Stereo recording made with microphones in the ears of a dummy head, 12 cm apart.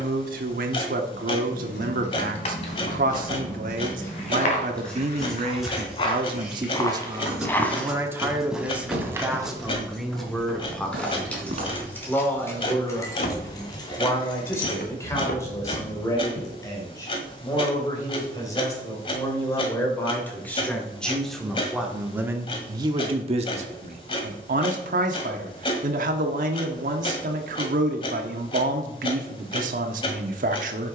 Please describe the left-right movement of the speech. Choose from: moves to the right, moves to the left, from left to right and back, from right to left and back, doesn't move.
from right to left and back.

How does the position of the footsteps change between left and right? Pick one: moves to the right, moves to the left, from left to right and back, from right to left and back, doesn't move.
moves to the right.